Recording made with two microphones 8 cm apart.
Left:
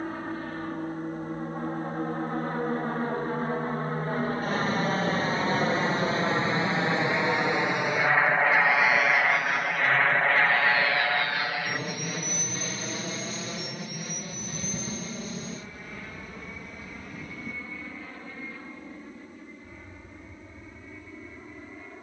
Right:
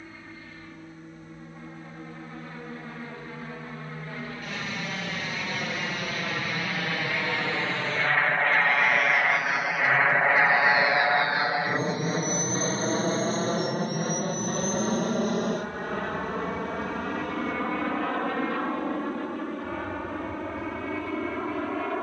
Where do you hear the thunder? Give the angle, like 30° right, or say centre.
50° left.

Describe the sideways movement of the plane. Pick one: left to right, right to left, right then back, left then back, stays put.
left to right.